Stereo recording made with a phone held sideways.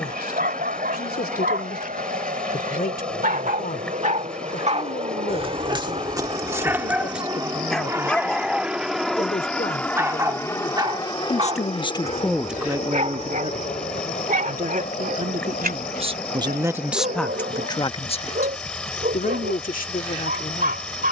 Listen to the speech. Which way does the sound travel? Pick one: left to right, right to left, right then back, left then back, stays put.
right then back.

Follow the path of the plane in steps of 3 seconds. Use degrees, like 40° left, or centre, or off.
70° right, 50° right, 20° right, 20° left, 40° left, 60° left, 60° left.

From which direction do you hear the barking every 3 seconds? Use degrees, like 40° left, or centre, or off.
80° right, 50° right, 10° right, 30° right, 60° right, 80° right, 80° right.